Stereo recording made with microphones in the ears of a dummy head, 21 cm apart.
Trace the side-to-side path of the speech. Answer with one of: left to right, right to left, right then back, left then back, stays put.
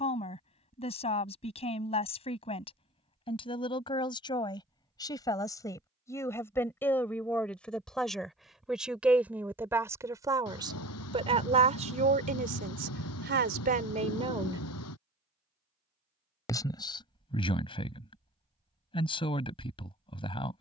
right then back.